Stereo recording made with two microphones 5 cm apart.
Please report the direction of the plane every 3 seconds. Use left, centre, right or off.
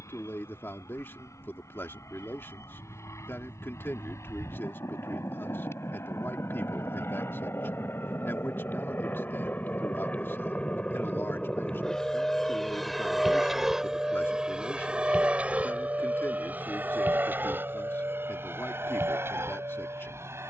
left, left, left, left, centre, right, right.